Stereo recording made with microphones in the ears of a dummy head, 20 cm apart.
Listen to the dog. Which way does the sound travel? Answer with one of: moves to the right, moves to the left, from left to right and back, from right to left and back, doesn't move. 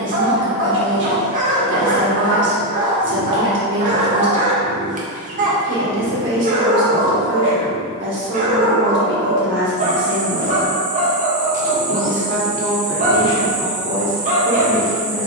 doesn't move.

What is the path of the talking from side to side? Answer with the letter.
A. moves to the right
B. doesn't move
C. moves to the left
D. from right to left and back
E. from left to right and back
B.